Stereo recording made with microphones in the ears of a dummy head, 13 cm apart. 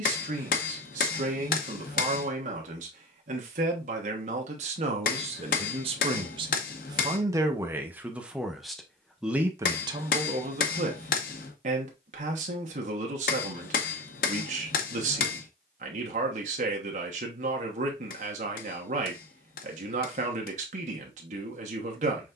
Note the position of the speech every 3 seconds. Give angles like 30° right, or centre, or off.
60° right, 50° right, 20° right, 40° right, 60° right, 60° right, 60° right, 60° right.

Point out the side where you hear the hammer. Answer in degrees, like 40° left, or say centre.
70° left.